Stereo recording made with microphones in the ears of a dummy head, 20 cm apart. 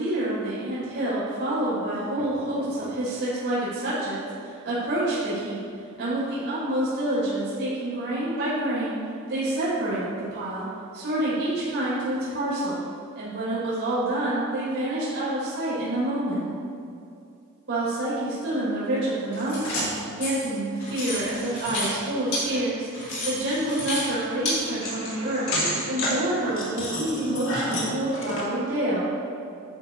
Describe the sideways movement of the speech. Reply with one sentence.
You can hear the speech stay put.